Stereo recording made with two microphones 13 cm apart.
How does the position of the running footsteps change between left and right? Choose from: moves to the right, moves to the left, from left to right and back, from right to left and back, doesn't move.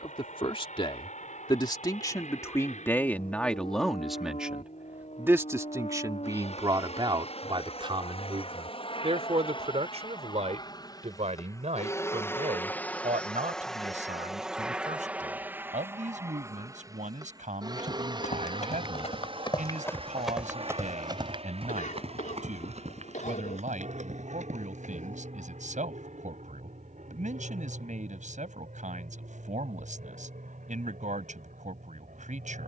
moves to the right.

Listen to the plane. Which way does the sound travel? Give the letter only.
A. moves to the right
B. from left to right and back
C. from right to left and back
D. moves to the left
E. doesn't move
A.